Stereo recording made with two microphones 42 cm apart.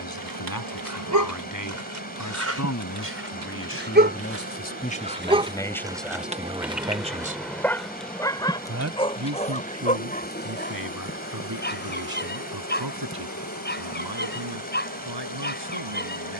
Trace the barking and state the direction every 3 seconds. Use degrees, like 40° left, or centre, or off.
40° right, 20° right, centre, 20° left, 20° left, 20° left.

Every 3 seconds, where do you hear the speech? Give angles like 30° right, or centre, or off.
50° left, 20° left, 20° right, 50° right, 60° right, 70° right.